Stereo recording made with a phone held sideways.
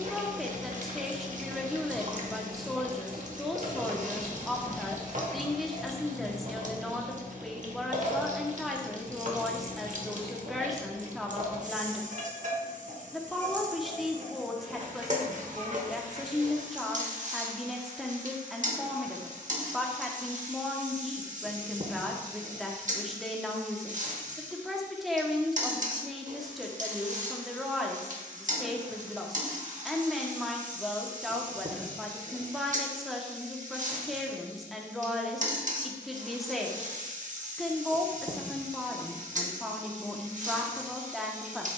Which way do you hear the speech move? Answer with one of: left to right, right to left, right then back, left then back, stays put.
stays put.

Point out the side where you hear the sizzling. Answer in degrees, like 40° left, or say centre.
50° right.